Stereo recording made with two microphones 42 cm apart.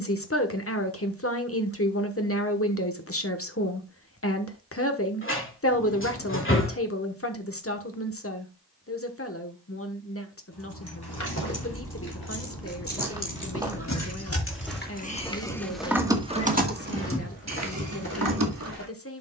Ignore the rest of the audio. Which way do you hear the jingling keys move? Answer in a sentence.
You can hear the jingling keys move from left to right.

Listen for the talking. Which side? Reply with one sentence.
In this clip you hear the talking on the left.